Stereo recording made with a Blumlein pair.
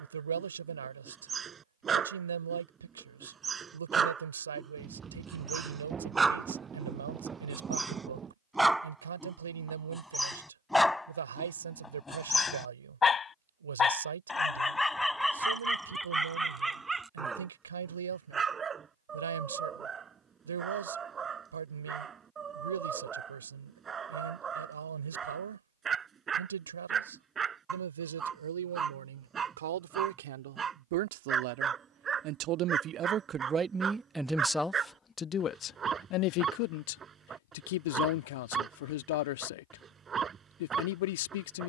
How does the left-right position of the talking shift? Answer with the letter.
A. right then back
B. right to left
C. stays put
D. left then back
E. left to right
B.